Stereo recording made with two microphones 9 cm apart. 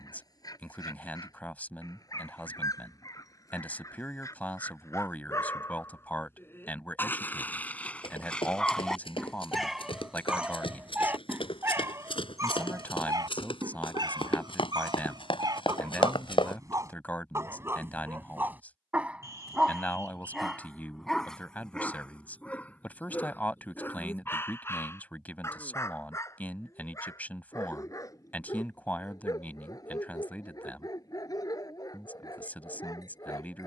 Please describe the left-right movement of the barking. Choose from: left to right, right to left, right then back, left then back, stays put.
right then back.